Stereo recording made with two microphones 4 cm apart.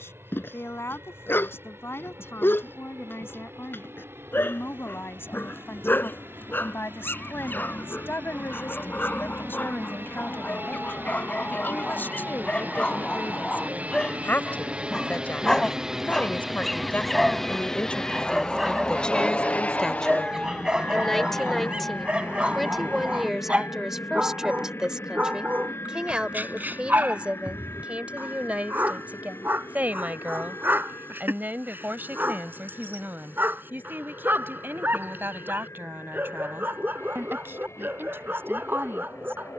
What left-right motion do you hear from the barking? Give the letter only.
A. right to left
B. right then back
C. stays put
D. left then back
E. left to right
E.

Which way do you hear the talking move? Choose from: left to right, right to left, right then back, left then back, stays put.
left to right.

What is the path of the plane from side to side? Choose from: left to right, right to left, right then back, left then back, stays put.
right to left.